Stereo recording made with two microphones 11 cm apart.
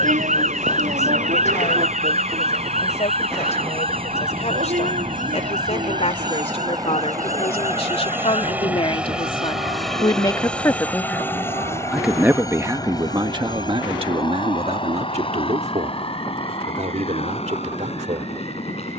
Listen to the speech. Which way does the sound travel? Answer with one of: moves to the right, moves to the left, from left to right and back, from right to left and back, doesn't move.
moves to the right.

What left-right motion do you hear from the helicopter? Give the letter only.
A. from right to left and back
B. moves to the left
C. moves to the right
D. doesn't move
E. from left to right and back
B.